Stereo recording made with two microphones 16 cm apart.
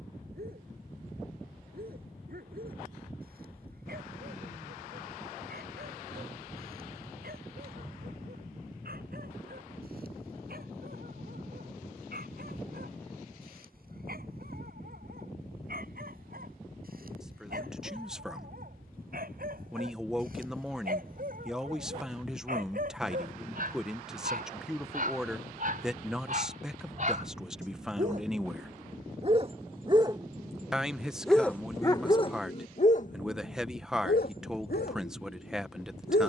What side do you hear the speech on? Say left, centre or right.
centre.